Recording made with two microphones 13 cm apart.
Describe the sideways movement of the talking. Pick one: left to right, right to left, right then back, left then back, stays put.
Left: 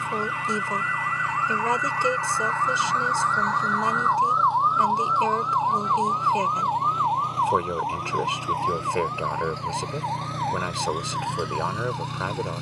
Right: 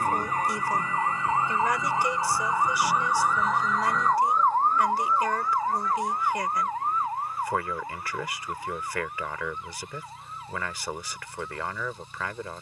stays put.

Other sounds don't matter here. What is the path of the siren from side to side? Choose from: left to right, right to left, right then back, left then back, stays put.
right to left.